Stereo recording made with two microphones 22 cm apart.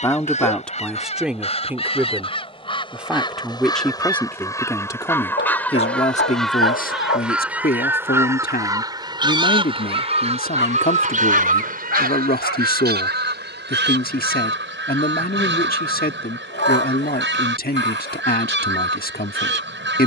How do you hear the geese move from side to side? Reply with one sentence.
In this clip you hear the geese move to the right.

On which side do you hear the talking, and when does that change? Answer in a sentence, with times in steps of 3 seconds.
In this clip you hear the talking in the centre from 0 s and on the left from 6 s.